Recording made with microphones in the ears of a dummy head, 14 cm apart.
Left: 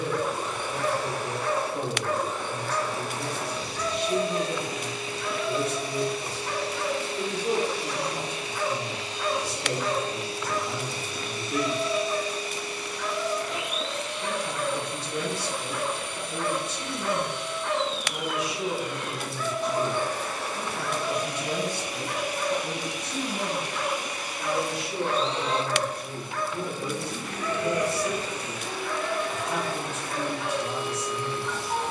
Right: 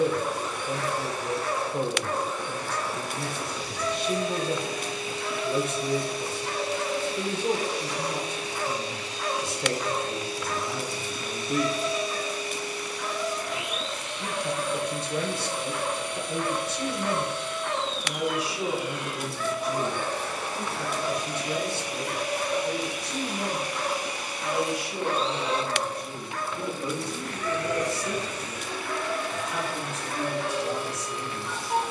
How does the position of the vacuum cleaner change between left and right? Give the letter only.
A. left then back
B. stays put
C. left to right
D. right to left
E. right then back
E.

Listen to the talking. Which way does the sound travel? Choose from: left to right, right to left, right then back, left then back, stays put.
right to left.